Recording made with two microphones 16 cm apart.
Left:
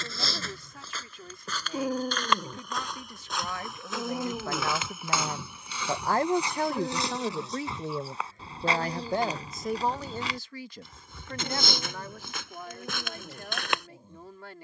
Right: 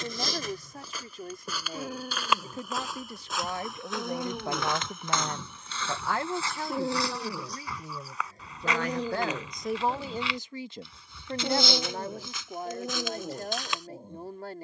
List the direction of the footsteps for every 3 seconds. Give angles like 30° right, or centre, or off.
10° right, centre, 20° left, 40° left, 60° left.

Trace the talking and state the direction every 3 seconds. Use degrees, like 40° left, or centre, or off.
40° right, 20° right, 60° left, 10° right, 40° right.